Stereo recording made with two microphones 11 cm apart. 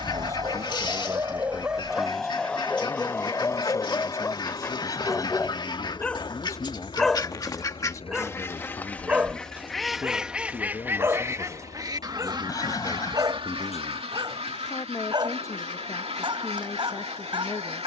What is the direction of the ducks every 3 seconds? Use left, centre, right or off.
left, left, left, centre, right, right.